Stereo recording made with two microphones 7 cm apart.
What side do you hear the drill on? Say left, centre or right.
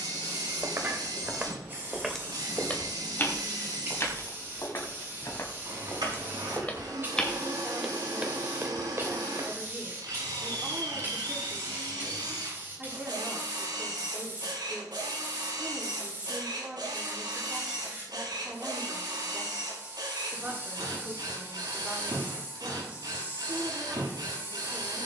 right.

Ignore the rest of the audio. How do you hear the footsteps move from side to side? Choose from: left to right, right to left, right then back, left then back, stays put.
left then back.